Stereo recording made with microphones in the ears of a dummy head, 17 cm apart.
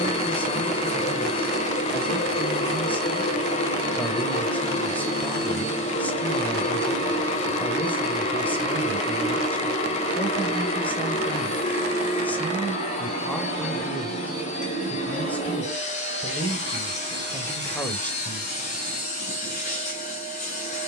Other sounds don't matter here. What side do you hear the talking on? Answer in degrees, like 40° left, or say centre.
10° left.